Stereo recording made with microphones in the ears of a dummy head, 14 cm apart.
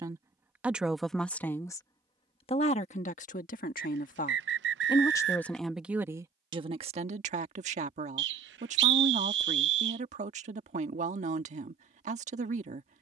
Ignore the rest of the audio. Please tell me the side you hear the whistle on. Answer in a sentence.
In this clip you hear the whistle on the right.